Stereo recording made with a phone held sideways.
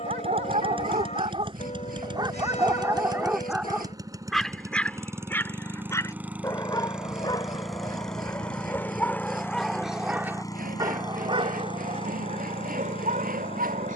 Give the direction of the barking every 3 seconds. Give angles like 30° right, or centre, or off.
40° right, centre, 20° left, 20° right, 70° right.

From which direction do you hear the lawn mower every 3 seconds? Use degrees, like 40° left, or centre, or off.
30° right, 20° right, centre, 20° left, 40° left.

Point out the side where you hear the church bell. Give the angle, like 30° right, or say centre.
50° left.